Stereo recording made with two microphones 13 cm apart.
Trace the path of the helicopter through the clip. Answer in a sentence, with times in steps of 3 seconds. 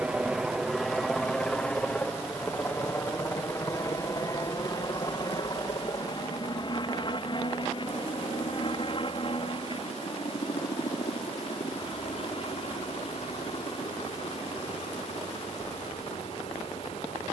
In this clip you hear the helicopter in the centre from 0 s and on the left from 3 s.